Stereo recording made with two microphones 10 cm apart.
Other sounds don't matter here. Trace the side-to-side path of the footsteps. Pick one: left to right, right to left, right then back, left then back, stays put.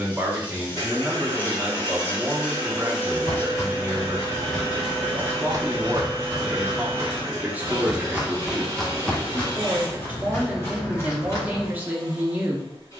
right then back.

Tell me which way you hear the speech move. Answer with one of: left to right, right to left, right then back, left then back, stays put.
stays put.